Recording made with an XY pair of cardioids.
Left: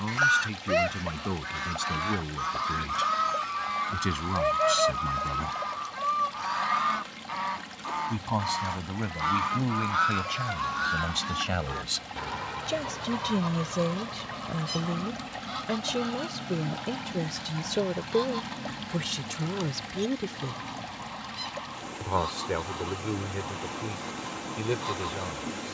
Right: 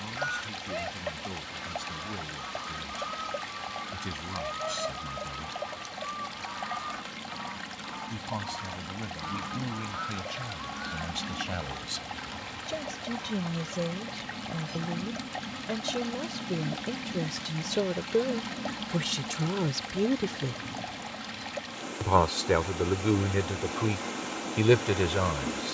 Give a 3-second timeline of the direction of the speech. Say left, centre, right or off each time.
left, left, left, left, left, centre, centre, right, right.